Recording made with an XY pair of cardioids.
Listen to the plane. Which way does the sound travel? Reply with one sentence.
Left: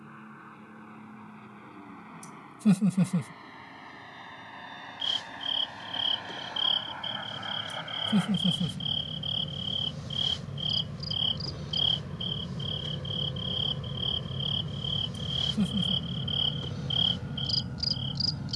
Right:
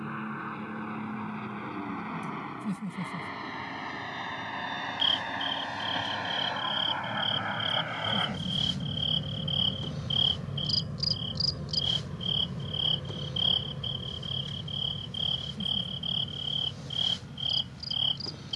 You can hear the plane go from the right side to the left.